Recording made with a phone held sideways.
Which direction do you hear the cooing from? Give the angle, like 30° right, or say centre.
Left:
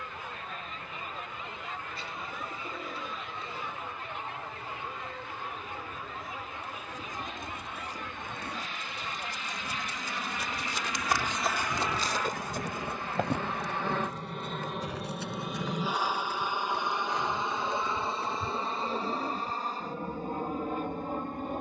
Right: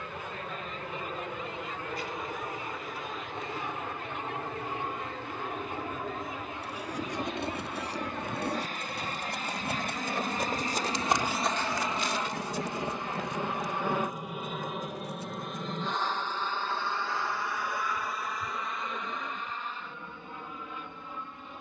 30° left.